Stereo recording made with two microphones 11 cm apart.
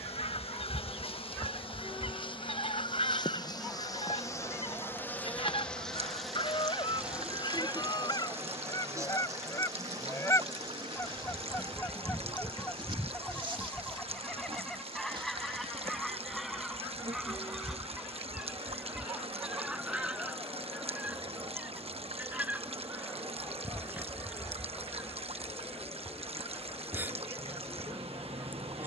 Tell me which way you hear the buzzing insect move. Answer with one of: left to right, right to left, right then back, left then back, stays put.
left to right.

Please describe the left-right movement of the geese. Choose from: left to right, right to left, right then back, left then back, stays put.
left to right.